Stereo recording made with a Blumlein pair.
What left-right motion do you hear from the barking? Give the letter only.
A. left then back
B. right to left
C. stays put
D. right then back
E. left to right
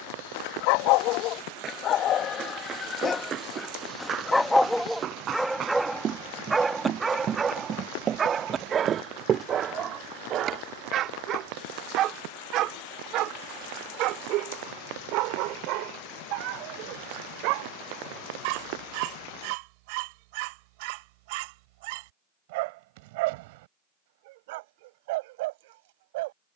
E.